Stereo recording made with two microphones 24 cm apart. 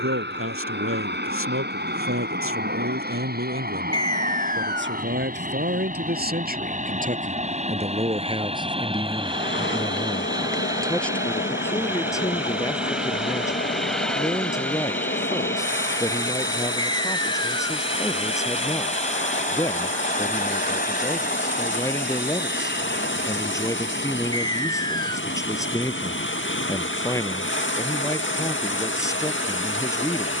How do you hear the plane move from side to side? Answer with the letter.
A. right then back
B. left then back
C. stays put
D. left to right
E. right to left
E.